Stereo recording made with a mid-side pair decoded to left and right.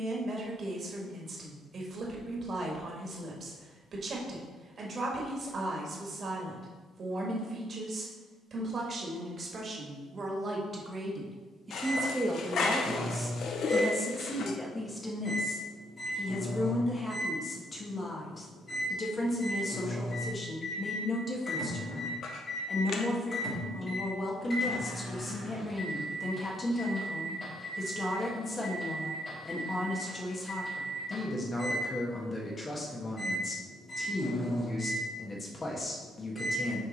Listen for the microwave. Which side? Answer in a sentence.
You can hear the microwave on the left.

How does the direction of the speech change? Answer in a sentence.
In this clip you hear the speech travel towards the left.